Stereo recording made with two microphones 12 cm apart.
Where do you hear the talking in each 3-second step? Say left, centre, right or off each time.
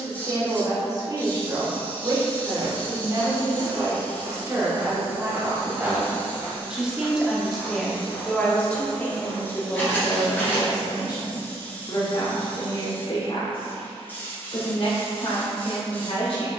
right, right, centre, left, left, left.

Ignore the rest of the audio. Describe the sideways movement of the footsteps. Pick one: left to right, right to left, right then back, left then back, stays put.
right to left.